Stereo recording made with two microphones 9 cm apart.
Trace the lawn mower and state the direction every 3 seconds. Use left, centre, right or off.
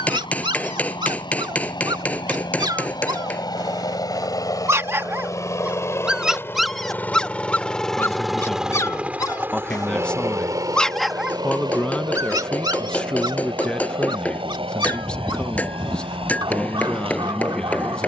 left, left, centre, right, right, right.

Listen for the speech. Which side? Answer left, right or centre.
centre.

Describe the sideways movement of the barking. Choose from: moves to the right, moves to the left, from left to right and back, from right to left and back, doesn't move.
from right to left and back.